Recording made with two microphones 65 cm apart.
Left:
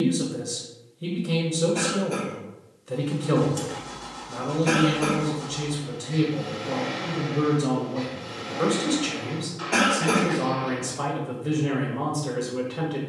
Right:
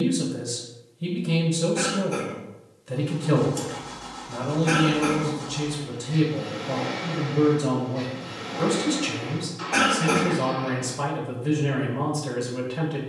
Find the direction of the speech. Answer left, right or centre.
right.